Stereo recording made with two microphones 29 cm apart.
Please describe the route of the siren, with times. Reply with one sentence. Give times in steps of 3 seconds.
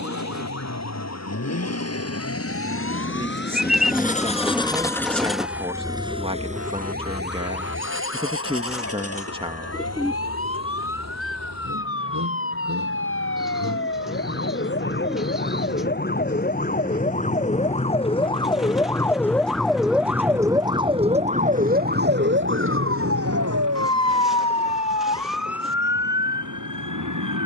In this clip you hear the siren on the left from 0 s, in the centre from 18 s and on the right from 21 s.